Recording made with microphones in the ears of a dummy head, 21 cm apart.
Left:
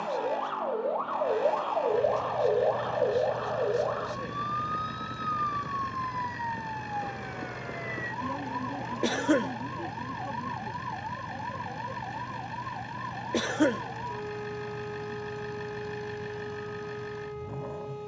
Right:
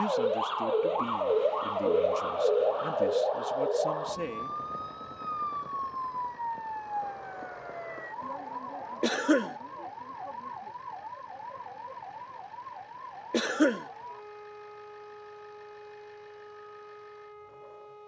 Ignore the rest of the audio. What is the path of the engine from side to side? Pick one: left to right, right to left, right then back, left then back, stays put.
stays put.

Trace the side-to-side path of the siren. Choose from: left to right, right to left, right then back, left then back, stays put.
right to left.